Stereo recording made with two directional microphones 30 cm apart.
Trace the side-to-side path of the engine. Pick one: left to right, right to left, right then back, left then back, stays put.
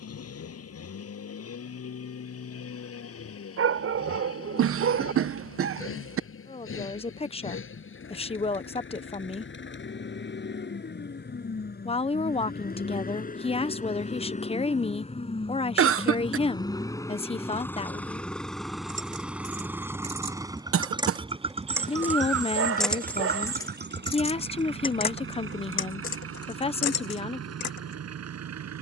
left to right.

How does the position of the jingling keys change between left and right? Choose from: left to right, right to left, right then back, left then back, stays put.
right to left.